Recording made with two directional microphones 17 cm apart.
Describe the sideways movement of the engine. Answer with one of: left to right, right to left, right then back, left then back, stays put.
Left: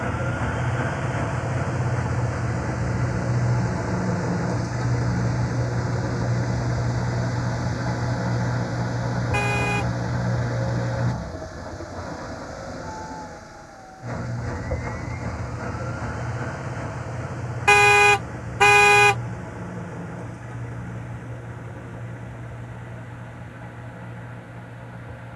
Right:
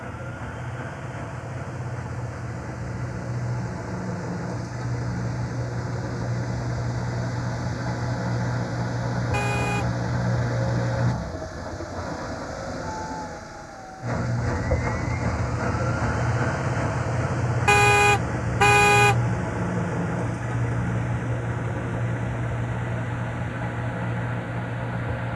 left to right.